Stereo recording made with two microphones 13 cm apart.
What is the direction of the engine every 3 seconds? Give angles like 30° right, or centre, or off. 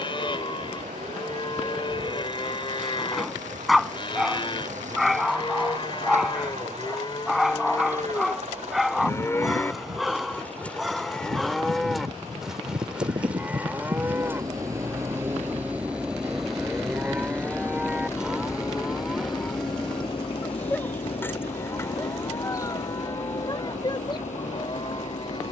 70° right, 70° right, 60° right, 50° right, 30° right, centre, 30° left, 60° left, 70° left.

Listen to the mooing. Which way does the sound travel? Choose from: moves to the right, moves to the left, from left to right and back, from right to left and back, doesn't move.
from left to right and back.